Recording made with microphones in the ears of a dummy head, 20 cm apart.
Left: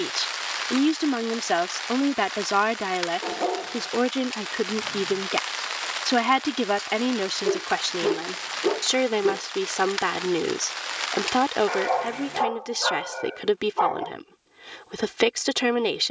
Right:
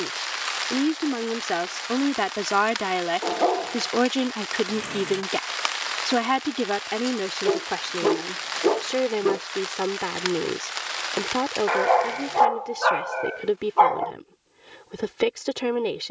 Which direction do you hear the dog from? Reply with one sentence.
In this clip you hear the dog on the right.